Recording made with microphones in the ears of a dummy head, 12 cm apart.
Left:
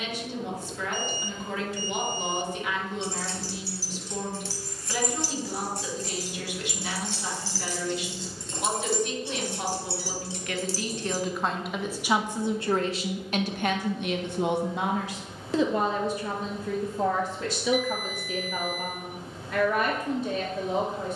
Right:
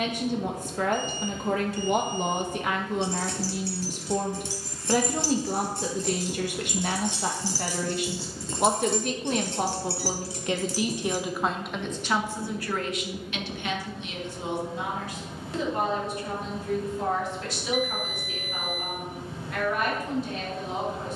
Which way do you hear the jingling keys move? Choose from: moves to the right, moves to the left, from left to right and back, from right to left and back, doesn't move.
from left to right and back.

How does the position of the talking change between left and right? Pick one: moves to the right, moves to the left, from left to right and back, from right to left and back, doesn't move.
moves to the left.